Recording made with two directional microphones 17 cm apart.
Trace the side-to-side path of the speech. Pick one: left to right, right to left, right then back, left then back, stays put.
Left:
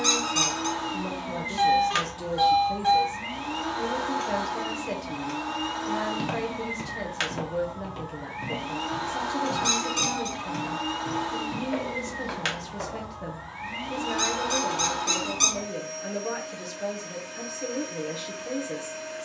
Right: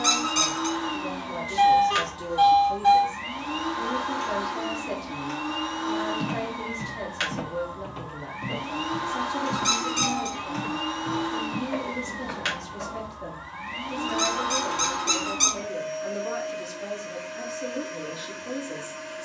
stays put.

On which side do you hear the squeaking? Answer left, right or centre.
centre.